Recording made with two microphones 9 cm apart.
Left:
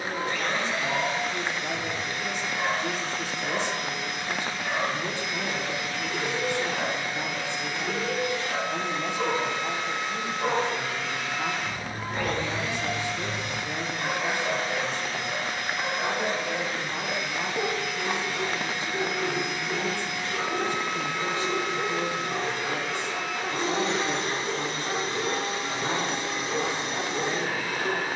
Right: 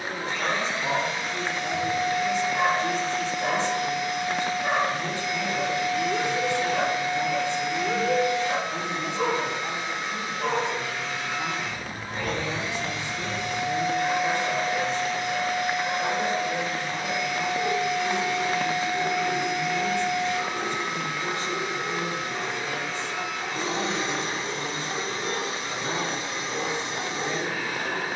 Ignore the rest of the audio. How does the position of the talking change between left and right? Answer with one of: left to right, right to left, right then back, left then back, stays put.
stays put.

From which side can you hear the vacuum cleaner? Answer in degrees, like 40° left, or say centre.
60° left.